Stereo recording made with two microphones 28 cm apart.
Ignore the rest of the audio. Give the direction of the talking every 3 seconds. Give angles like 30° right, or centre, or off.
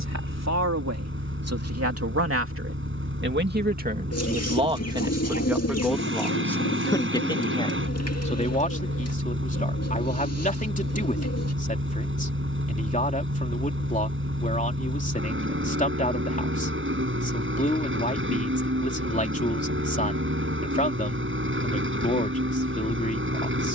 60° right, 20° right, 20° left, 30° left, 30° left, 30° left, 30° left, 30° left.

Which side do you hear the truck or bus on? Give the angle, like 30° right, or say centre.
50° right.